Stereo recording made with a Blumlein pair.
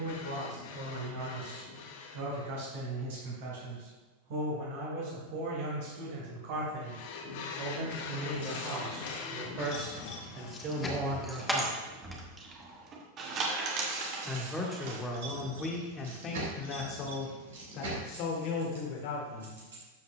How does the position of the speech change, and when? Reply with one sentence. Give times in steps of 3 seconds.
You can hear the speech on the right from 0 s, in the centre from 12 s and on the left from 15 s.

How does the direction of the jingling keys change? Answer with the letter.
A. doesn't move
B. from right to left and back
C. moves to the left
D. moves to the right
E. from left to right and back
D.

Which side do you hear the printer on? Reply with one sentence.
In this clip you hear the printer on the left.